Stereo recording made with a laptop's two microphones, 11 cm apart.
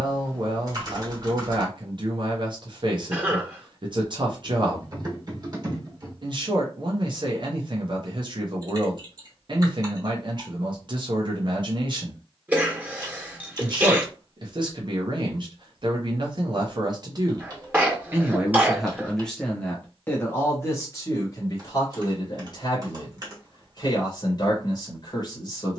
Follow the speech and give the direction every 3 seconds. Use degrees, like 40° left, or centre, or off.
50° right, 50° right, 50° right, 50° right, 50° right, 40° right, 10° left, 40° left, 40° left.